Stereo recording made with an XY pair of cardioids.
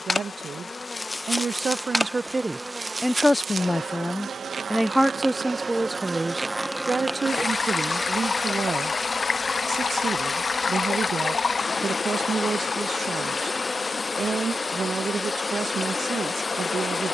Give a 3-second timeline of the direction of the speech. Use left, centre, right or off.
right, centre, right, right, right, right.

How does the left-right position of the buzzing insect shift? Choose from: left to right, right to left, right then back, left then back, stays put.
right then back.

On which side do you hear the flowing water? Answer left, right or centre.
left.